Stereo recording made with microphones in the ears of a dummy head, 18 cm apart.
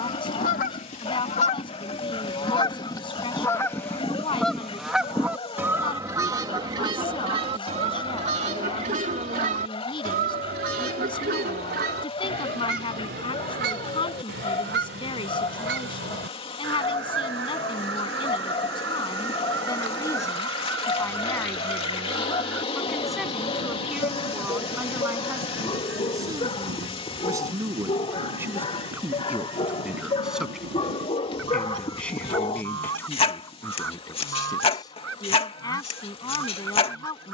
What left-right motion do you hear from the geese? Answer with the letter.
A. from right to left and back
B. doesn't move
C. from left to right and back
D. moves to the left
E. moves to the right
E.